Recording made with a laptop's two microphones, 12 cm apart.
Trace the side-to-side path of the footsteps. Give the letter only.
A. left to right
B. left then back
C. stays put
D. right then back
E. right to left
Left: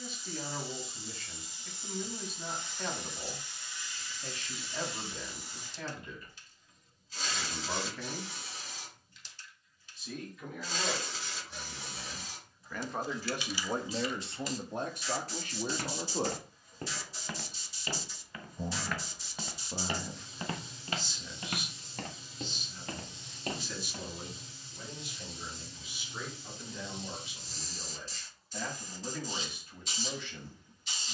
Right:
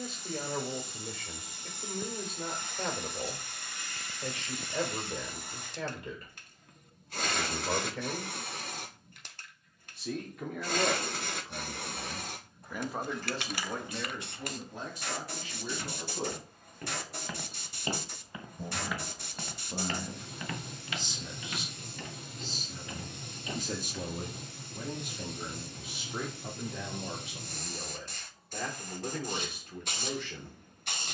D.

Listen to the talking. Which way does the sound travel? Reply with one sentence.
You can hear the talking go left and come back.